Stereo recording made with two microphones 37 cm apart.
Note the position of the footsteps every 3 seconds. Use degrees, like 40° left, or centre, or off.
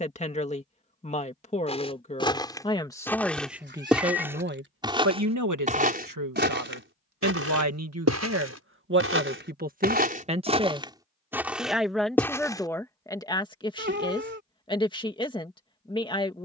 10° left, 10° right, 40° right, 20° right, 10° left, off.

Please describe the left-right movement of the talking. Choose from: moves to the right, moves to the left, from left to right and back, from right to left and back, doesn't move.
from left to right and back.